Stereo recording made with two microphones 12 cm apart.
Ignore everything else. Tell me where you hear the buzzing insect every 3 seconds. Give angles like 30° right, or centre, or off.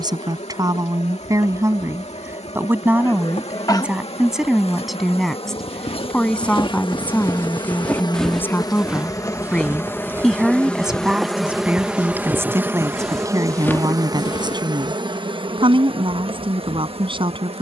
70° left, 60° left, 40° left, 10° left, 30° right, 50° right.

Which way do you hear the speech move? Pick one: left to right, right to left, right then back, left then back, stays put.
left then back.